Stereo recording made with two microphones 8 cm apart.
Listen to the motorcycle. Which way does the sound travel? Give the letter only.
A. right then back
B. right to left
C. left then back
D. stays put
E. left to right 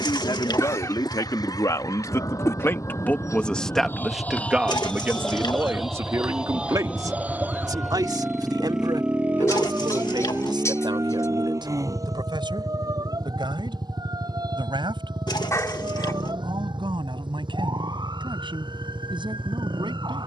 E.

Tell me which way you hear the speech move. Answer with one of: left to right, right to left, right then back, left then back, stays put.
left to right.